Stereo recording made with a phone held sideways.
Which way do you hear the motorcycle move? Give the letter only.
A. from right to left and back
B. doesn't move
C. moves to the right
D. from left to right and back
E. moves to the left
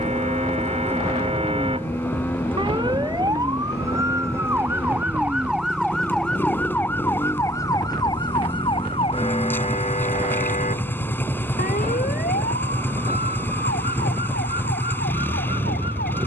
B.